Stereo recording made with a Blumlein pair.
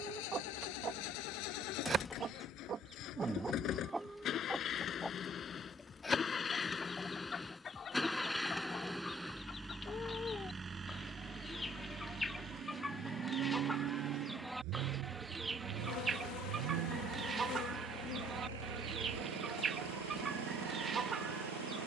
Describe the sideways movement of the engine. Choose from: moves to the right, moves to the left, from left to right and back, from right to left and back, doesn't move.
moves to the right.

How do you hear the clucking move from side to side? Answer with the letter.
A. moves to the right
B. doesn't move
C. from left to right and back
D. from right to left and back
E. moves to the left
D.